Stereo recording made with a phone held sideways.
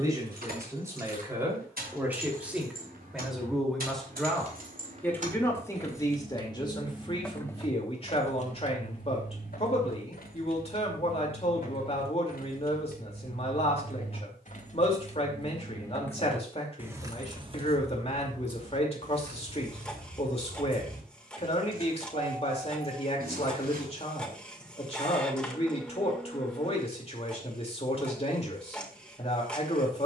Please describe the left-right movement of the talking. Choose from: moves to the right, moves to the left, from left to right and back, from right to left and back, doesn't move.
moves to the left.